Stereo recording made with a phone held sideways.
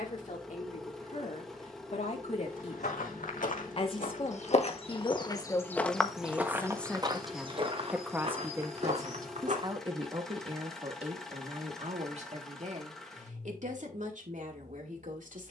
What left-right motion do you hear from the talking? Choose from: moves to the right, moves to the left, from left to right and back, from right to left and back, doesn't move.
moves to the right.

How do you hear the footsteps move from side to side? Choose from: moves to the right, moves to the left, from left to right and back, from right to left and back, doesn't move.
moves to the right.